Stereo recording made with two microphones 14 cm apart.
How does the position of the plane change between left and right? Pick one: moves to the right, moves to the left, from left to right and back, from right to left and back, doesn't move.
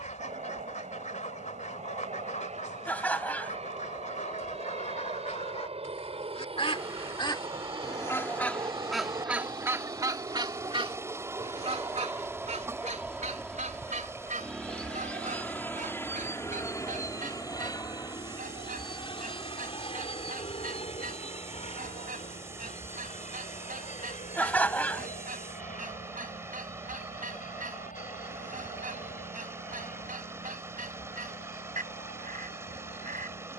moves to the left.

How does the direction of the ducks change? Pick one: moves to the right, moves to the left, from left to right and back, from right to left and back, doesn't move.
moves to the right.